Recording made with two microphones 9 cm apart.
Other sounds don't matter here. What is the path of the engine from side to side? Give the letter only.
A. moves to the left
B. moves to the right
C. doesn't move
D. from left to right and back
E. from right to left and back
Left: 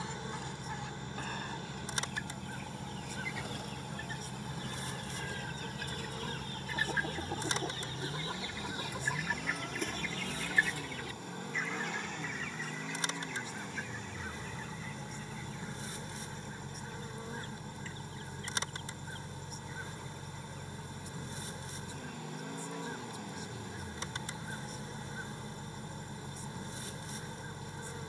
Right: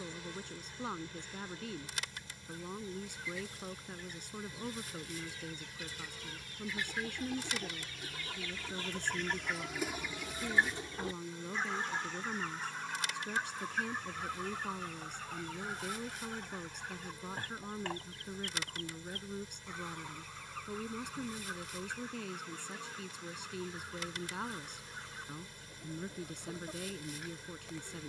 C.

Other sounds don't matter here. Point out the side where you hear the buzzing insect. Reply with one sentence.
In this clip you hear the buzzing insect on the left.